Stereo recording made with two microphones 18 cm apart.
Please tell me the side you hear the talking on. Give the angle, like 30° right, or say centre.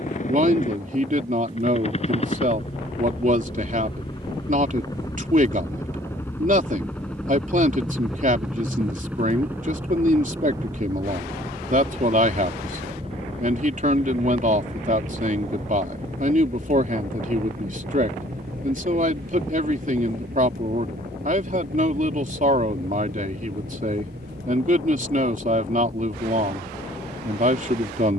50° right.